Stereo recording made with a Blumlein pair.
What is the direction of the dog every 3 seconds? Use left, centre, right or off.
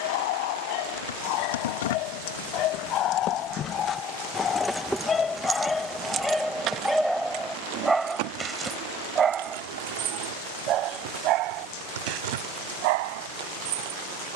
left, left, centre, right, right.